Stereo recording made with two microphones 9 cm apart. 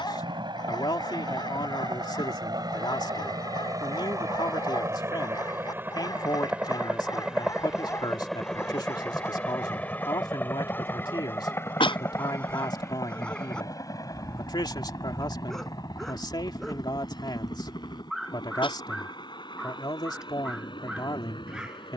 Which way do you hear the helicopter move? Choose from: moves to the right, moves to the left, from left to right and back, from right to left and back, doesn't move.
moves to the left.